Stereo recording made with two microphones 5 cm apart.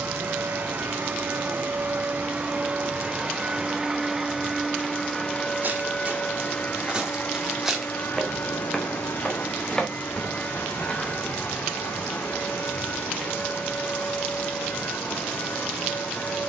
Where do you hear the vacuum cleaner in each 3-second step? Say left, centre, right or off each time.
right, centre, left, left, left, left.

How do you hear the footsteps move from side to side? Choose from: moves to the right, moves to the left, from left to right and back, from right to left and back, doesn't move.
moves to the left.